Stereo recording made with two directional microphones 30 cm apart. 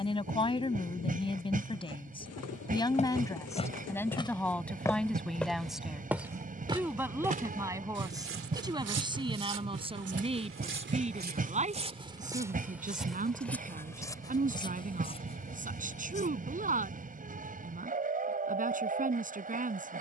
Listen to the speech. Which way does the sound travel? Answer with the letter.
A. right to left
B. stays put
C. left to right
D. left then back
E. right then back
C.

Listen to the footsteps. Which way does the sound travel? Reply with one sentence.
In this clip you hear the footsteps go right and come back.